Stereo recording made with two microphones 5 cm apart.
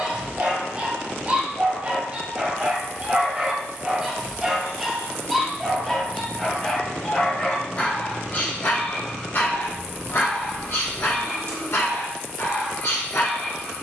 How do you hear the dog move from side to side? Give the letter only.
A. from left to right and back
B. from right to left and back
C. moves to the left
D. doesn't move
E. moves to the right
C.